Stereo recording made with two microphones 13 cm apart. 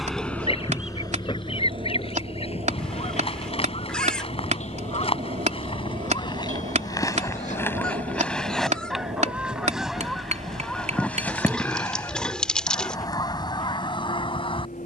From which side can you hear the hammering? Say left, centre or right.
right.